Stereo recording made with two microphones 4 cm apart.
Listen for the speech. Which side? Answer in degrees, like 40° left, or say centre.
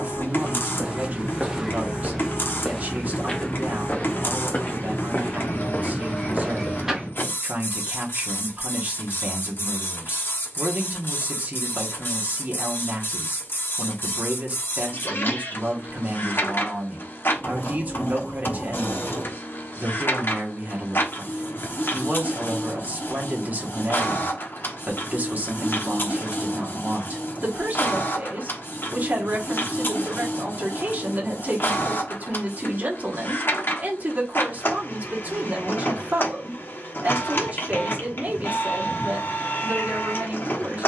50° right.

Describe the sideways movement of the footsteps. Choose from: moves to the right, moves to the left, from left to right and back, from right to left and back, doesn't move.
from right to left and back.